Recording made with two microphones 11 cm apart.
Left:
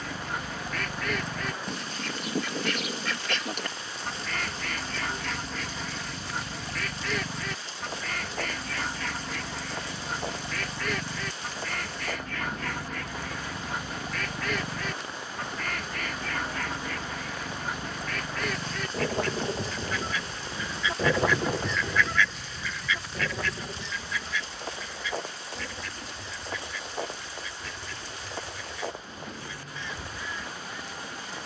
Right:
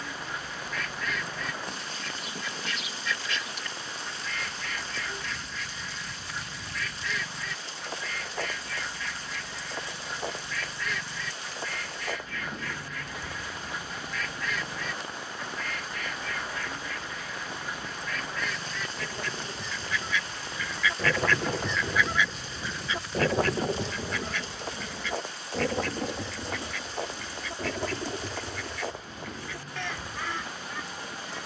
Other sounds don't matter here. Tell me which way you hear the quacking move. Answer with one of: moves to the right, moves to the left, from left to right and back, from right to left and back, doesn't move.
moves to the right.